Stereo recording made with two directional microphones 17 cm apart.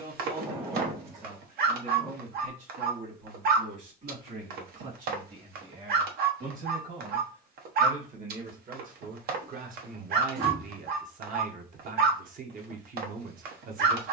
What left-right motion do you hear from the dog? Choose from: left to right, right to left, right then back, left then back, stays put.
stays put.